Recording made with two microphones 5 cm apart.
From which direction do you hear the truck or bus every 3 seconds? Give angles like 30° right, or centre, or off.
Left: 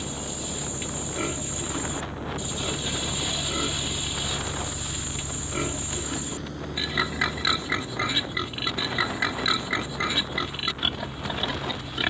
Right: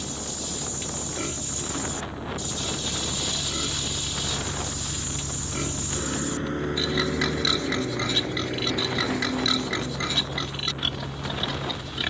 40° left, centre, 50° right, 70° right.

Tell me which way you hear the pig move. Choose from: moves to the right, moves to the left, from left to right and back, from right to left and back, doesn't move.
doesn't move.